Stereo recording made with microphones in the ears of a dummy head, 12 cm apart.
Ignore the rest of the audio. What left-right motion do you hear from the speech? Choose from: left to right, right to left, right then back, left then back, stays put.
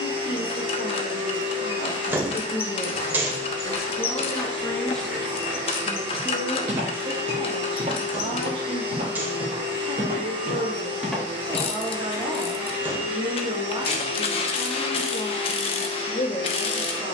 right then back.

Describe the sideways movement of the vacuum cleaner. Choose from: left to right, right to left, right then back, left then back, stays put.
stays put.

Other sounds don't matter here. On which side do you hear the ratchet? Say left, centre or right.
left.